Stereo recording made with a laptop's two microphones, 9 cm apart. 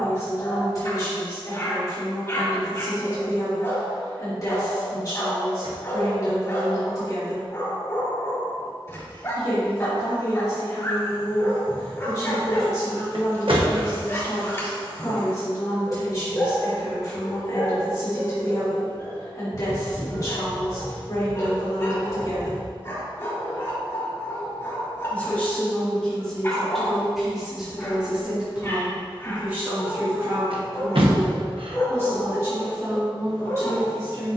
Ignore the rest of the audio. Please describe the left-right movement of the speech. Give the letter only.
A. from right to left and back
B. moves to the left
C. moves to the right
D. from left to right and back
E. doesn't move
C.